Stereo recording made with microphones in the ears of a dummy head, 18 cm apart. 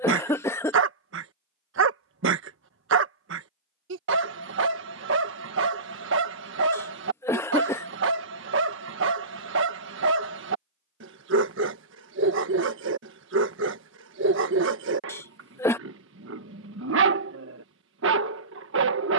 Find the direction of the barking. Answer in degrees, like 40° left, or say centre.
60° right.